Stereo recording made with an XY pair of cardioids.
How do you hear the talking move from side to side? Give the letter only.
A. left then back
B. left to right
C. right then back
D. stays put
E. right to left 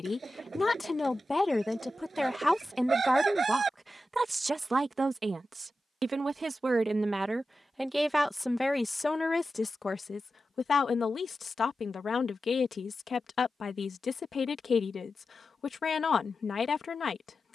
C.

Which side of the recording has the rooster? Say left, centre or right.
right.